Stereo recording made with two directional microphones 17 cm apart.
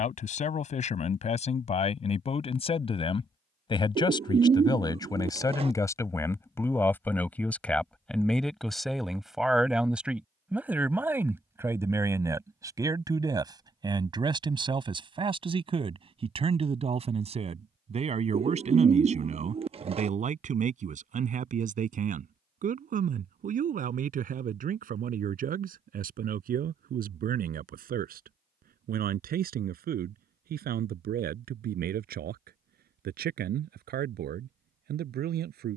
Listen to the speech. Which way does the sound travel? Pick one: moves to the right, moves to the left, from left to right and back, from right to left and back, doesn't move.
moves to the right.